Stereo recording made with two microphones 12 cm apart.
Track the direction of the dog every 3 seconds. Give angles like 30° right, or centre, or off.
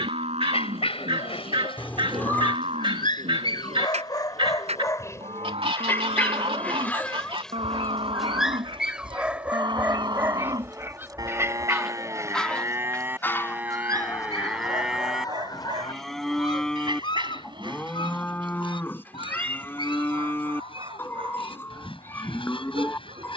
50° left, 30° left, centre, 20° right, 30° right, 40° right, 50° right, 50° right.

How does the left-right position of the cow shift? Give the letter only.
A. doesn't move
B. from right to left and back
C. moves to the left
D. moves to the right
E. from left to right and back
C.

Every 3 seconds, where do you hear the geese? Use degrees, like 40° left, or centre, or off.
50° right, 50° right, 50° right, 30° right, 20° left, 40° left, 50° left, 50° left.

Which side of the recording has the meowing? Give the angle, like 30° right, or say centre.
20° left.